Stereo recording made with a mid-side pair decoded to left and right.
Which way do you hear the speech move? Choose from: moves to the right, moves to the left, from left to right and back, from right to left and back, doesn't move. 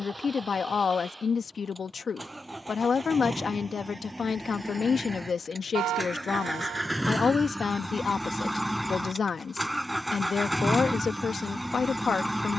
doesn't move.